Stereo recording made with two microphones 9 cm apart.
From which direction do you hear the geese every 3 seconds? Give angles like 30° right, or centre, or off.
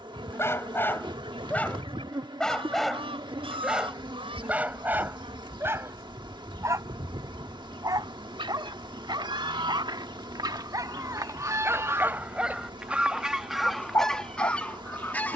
80° right, 80° right, 70° right, 50° right, centre.